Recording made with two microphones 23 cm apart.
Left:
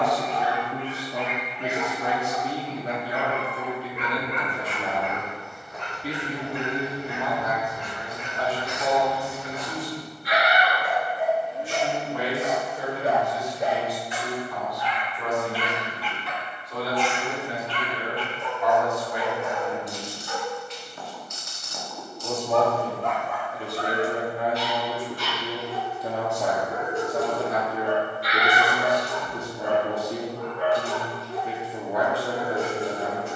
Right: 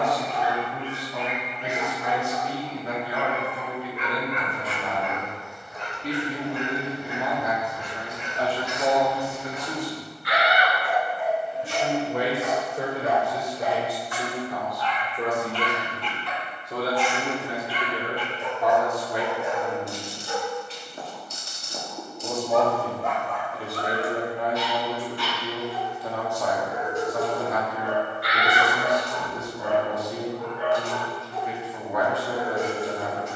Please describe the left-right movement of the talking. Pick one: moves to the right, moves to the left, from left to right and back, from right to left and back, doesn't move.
from left to right and back.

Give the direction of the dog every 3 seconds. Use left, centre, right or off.
left, left, left, left, left, centre, right, centre, left, left, left.